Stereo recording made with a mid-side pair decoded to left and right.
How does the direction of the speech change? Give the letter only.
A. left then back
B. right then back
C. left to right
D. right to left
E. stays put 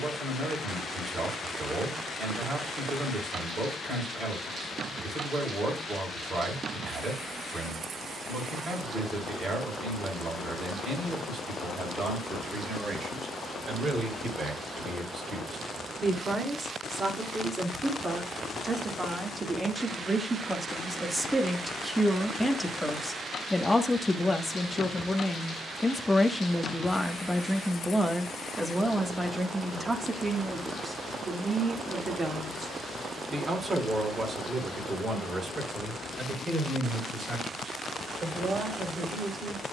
A.